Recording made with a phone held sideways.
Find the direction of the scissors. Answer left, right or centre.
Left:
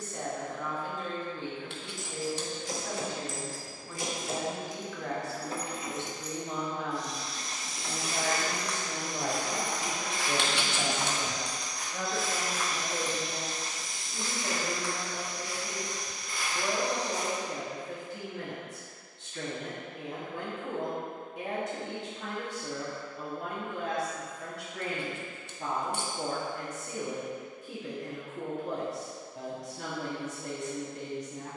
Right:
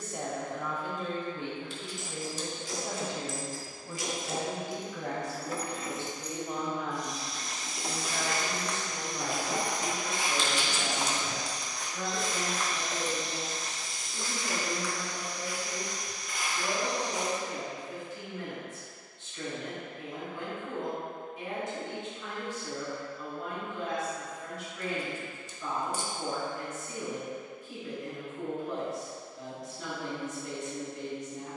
left.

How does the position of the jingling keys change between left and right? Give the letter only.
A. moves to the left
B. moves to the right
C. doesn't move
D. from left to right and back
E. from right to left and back
B.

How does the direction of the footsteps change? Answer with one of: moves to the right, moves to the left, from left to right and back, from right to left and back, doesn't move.
from left to right and back.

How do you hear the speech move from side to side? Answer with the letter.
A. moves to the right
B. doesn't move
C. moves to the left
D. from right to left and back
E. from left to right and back
C.